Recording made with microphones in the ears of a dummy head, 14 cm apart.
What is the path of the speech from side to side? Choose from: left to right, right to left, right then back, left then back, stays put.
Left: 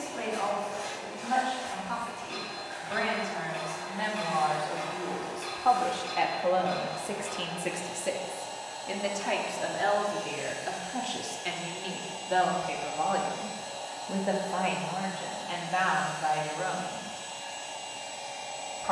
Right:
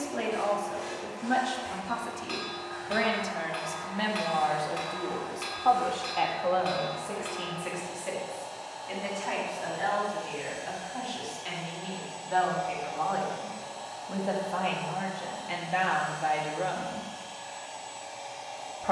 left then back.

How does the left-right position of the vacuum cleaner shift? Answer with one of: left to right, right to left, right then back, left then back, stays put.
stays put.